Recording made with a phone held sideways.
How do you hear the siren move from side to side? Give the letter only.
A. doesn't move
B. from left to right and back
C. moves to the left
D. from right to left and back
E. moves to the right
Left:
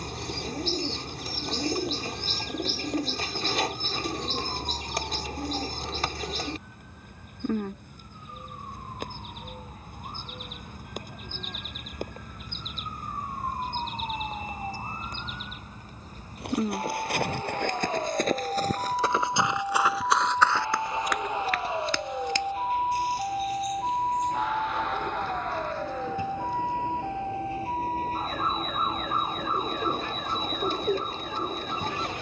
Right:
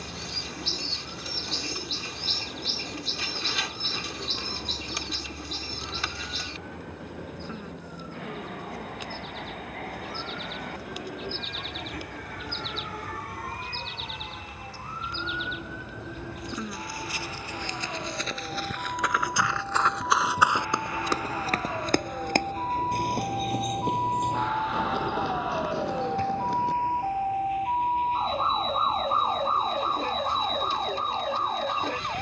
E.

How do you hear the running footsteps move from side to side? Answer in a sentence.
You can hear the running footsteps go from the left side to the right.